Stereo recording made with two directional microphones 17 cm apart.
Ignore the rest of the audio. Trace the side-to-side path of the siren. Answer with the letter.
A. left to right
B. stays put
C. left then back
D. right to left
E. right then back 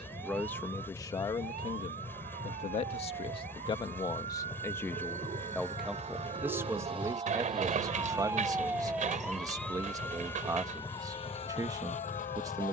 D.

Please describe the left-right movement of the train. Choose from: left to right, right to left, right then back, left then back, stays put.
stays put.